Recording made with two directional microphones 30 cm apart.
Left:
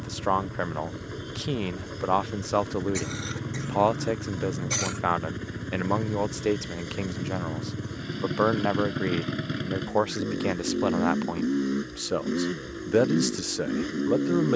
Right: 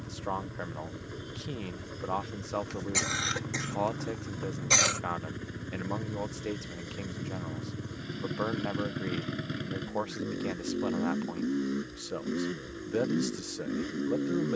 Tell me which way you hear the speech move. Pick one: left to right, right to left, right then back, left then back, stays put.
stays put.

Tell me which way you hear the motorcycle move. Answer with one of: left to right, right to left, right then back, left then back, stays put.
stays put.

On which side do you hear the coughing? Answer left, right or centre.
right.